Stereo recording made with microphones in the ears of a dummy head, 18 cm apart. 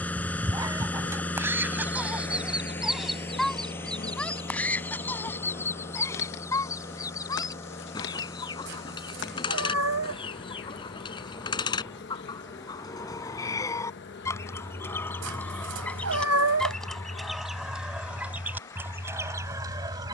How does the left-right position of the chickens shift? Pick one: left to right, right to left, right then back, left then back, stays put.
left then back.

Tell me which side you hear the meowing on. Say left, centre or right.
right.